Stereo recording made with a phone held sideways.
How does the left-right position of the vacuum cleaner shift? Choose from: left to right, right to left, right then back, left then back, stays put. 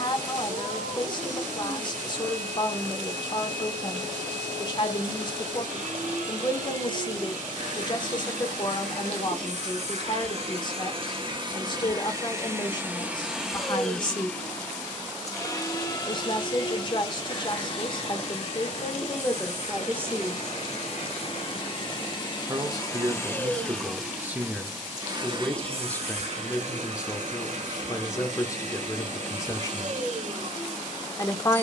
left then back.